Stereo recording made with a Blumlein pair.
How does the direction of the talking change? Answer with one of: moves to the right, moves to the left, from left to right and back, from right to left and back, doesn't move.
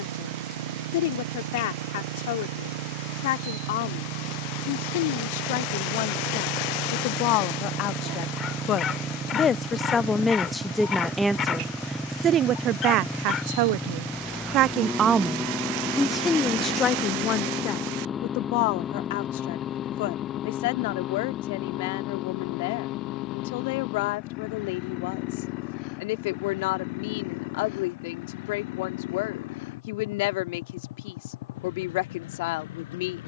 from left to right and back.